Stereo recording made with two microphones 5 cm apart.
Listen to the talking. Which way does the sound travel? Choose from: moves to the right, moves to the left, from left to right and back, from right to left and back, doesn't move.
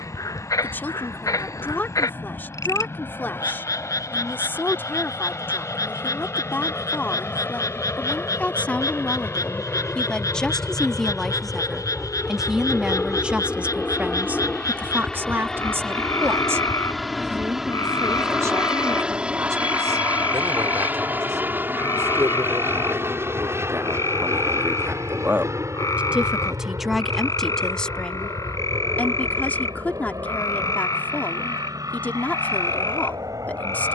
from left to right and back.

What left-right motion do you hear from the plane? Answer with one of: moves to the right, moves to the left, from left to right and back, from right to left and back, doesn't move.
moves to the right.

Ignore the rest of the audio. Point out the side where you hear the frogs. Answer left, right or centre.
left.